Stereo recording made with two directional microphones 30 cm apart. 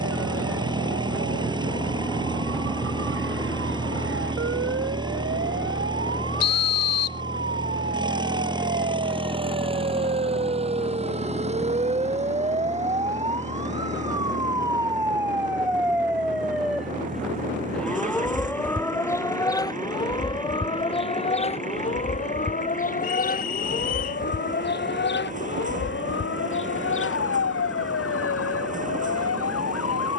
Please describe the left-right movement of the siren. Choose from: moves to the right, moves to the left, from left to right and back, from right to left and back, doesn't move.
moves to the left.